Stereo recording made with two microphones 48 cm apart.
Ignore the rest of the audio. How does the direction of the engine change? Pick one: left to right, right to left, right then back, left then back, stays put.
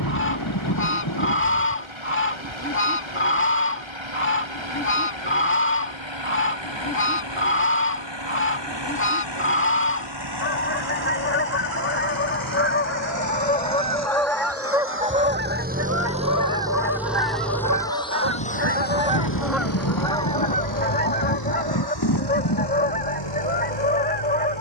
right to left.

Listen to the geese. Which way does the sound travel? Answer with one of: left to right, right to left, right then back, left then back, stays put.
right then back.